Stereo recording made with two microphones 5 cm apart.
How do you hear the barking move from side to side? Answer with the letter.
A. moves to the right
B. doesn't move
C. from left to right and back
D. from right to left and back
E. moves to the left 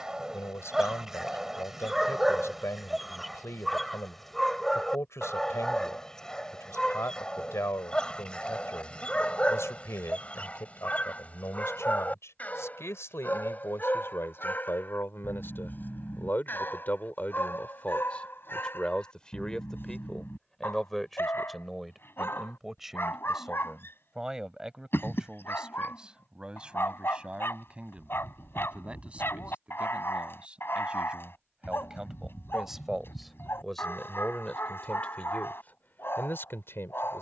E.